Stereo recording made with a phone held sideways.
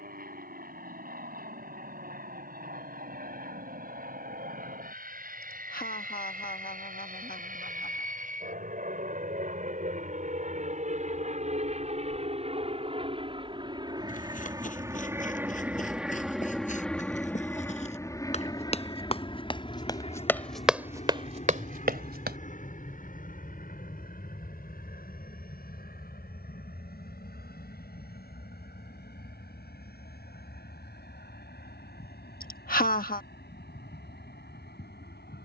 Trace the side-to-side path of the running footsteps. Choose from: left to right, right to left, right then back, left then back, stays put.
left to right.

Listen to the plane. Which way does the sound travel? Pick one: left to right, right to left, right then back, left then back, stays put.
right to left.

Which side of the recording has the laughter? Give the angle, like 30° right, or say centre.
60° left.